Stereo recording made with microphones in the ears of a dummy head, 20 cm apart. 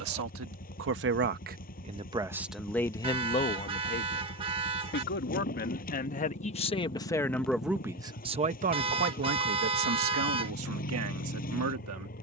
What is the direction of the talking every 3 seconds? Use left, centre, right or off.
right, left, centre, right.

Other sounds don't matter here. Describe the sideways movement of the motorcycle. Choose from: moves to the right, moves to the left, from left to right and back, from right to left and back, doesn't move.
doesn't move.